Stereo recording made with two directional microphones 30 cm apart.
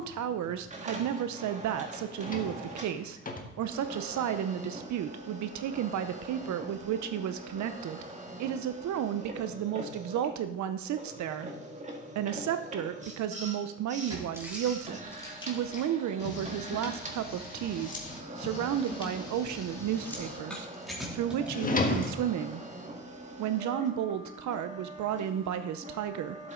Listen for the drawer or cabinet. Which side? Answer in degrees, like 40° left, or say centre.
30° left.